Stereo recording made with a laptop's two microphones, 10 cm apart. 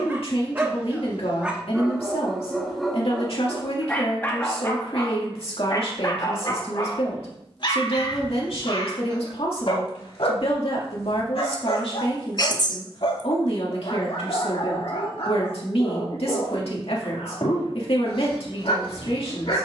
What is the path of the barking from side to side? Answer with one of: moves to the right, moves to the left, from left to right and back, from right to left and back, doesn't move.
moves to the left.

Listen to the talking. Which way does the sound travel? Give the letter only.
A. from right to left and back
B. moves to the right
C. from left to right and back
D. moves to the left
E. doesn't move
E.